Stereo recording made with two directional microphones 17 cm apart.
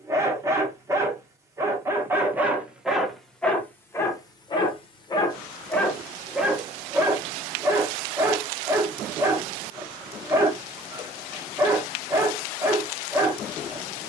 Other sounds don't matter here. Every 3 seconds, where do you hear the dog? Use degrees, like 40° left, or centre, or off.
10° right, 20° left, 10° right, 20° right, 20° right.